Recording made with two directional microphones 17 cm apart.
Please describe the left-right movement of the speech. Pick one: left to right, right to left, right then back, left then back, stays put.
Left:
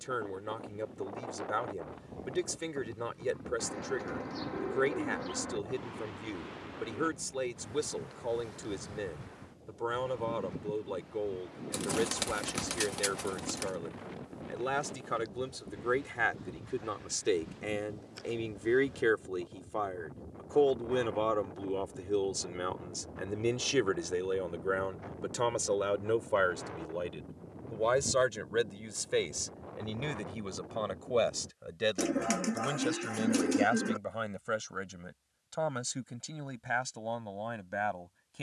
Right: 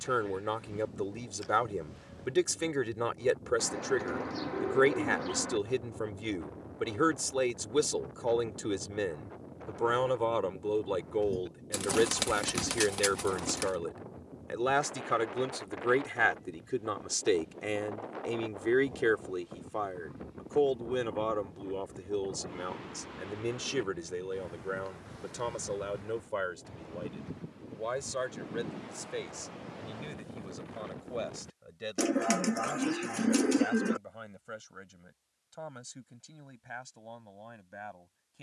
right to left.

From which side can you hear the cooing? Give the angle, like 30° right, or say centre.
20° right.